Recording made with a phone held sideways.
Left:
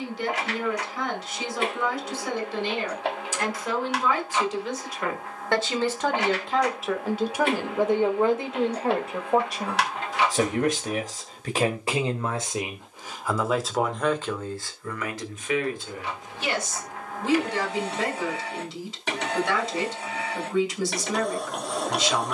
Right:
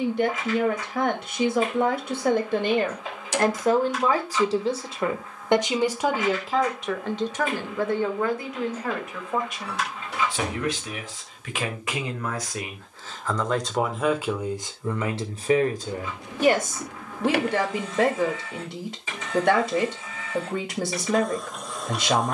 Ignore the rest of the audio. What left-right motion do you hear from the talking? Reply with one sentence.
In this clip you hear the talking go left and come back.